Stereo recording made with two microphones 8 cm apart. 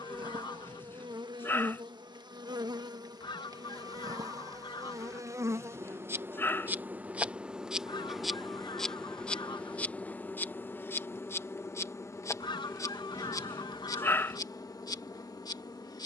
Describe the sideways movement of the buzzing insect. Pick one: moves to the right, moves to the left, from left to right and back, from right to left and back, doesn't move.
moves to the left.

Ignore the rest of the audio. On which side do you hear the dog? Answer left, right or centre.
left.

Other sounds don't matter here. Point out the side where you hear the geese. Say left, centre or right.
left.